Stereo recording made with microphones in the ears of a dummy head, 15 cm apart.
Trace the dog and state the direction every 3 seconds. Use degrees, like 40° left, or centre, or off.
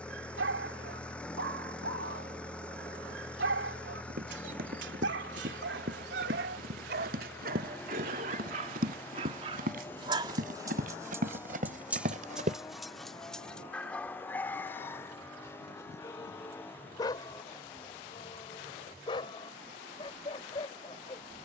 70° right, 70° right, 60° right, 20° right, centre, 20° left, 30° left.